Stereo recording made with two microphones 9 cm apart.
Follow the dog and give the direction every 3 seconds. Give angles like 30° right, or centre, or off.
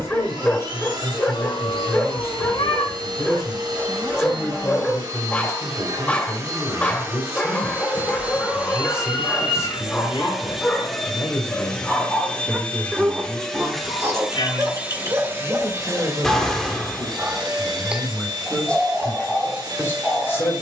20° left, 20° left, 20° left, 10° left, 20° right, 30° right, centre.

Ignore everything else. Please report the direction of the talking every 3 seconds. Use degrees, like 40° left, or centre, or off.
30° left, 30° left, 30° left, 30° left, centre, 20° right, 20° left.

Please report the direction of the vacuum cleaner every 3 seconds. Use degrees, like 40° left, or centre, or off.
50° right, 50° right, 30° right, centre, centre, 40° right, 50° right.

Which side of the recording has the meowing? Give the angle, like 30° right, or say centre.
70° left.